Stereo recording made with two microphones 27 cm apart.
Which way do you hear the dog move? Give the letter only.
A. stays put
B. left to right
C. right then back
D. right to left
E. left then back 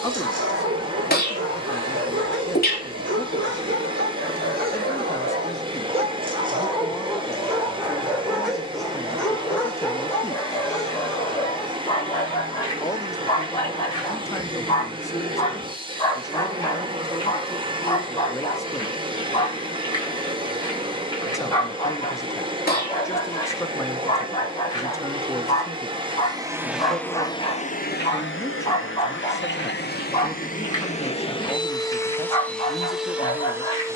D.